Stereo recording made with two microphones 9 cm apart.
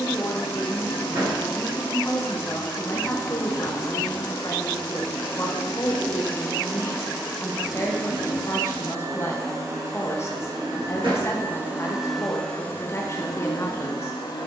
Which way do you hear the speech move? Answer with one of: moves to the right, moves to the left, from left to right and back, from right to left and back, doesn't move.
doesn't move.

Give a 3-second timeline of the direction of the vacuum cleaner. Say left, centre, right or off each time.
left, left, centre, right, left.